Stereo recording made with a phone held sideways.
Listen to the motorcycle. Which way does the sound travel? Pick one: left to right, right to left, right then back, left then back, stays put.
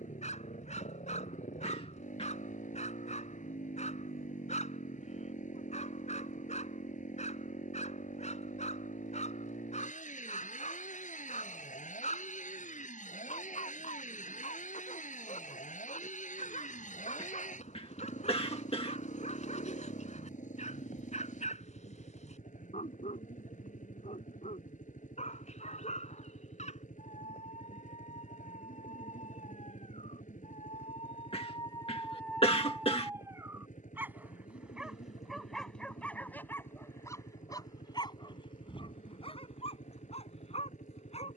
stays put.